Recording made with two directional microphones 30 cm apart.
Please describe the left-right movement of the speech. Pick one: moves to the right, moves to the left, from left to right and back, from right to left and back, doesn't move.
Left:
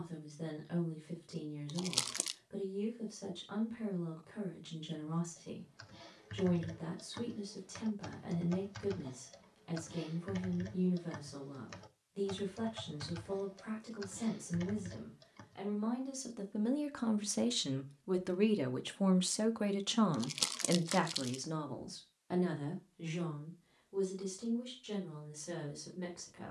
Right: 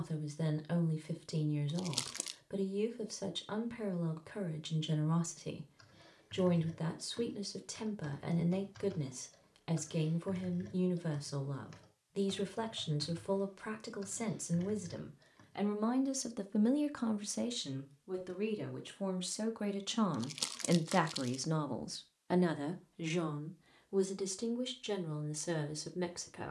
from right to left and back.